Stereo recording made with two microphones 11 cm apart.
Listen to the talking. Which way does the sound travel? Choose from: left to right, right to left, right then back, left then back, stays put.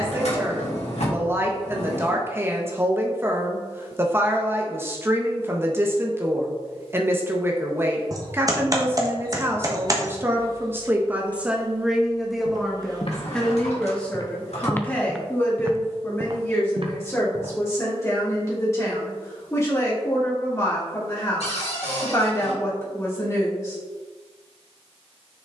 right to left.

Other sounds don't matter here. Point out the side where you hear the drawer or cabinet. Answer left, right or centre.
left.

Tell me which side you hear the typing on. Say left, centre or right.
right.